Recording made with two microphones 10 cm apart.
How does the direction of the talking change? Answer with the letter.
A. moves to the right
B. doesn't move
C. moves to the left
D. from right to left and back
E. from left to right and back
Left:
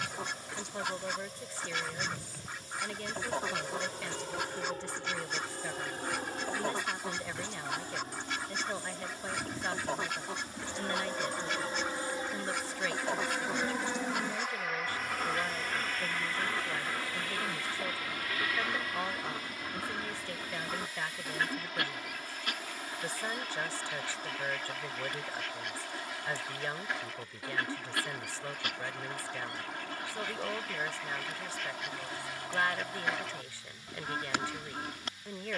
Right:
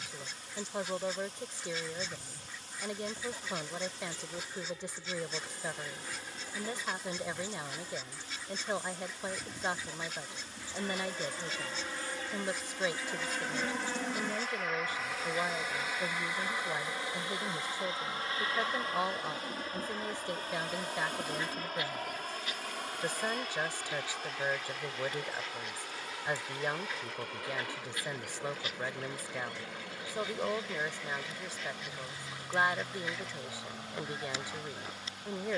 B.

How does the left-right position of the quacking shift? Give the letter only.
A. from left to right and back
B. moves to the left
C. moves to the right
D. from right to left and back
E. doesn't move
E.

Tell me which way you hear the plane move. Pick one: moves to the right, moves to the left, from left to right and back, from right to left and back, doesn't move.
moves to the right.